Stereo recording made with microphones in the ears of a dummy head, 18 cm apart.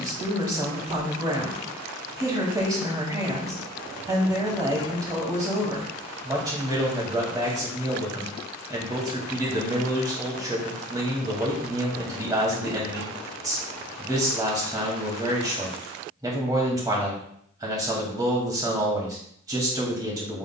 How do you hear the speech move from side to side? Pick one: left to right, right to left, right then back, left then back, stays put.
stays put.